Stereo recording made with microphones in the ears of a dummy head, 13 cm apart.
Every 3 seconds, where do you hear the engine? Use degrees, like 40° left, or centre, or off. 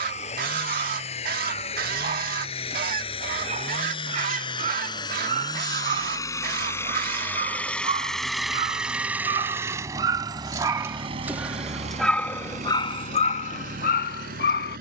50° left, 30° left, 10° left, 30° right, 60° right.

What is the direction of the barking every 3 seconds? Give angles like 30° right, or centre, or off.
50° right, 50° right, 40° right, 20° right, 50° left.